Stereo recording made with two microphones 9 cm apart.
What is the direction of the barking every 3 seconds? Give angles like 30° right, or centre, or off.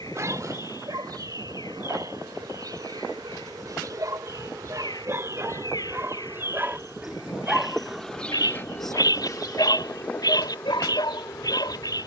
50° right, 40° right, centre, 60° left.